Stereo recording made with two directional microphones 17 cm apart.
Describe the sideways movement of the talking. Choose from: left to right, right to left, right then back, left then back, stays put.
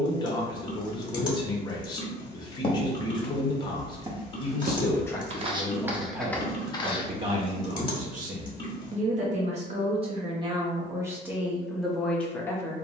right then back.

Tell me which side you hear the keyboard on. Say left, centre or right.
left.